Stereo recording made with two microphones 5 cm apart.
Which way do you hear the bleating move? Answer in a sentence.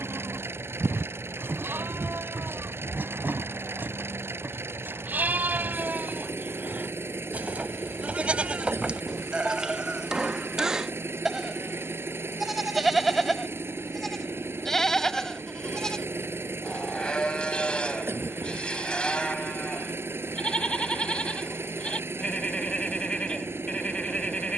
In this clip you hear the bleating go from the right side to the left.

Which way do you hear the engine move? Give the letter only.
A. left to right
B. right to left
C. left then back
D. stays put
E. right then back
D.